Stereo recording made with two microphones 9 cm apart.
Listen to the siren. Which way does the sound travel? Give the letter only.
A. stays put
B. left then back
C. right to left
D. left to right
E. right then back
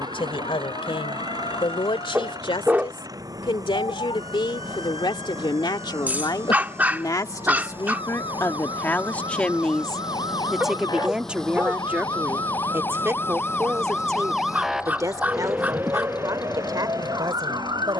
D.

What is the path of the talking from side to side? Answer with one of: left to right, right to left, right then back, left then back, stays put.
left to right.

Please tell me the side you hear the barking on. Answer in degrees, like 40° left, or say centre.
20° right.